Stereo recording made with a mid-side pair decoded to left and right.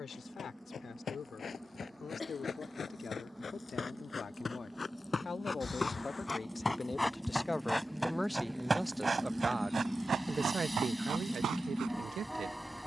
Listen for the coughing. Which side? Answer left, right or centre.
left.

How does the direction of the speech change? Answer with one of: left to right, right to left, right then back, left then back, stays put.
left to right.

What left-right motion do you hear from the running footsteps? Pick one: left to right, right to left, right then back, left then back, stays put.
left to right.